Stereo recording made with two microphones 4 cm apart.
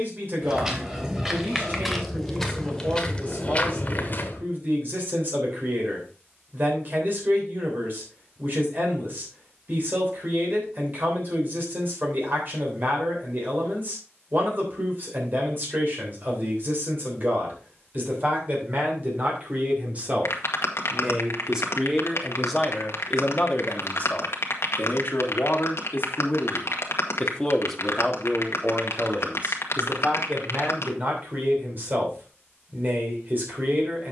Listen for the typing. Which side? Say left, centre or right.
left.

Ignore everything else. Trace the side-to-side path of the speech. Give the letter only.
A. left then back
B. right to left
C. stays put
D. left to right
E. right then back
A.